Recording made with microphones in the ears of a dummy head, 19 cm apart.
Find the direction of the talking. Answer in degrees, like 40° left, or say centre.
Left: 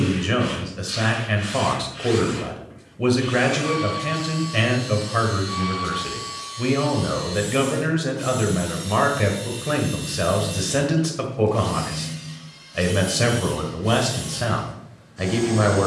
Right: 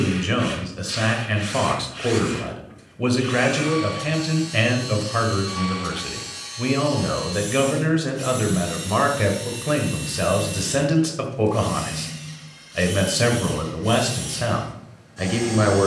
10° right.